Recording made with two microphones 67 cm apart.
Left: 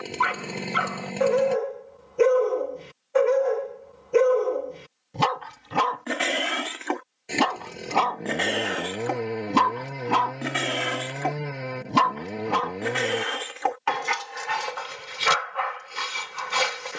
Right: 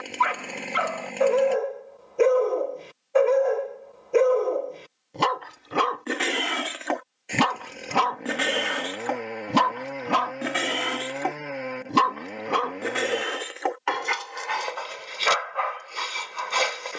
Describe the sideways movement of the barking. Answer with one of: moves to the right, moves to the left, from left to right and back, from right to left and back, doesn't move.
from left to right and back.